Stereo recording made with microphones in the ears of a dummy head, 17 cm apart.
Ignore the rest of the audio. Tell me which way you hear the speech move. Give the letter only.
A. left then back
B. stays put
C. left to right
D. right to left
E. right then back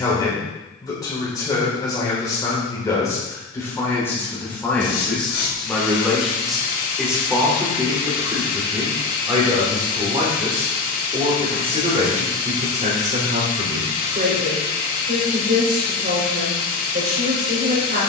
C.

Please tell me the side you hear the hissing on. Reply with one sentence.
You can hear the hissing on the left.